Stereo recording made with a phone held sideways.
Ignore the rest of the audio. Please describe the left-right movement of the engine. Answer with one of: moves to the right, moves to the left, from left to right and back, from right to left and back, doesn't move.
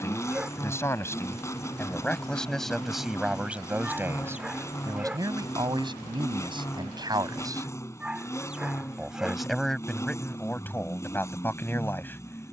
doesn't move.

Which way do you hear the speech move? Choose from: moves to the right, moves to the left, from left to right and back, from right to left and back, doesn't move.
from left to right and back.